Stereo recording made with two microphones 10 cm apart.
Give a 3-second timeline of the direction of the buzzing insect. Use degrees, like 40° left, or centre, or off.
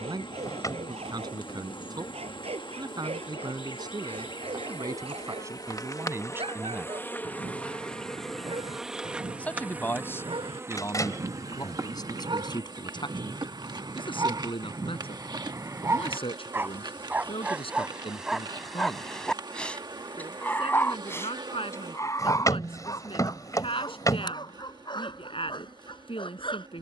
50° left, 40° left, 10° left, 20° right, 40° right, 40° right, 40° right, 40° right, 40° right.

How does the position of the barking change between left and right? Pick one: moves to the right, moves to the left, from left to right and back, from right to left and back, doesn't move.
moves to the left.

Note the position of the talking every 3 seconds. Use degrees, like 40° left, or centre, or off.
40° right, 40° right, 20° right, 30° left, 50° left, 60° left, 60° left, 60° left, 60° left.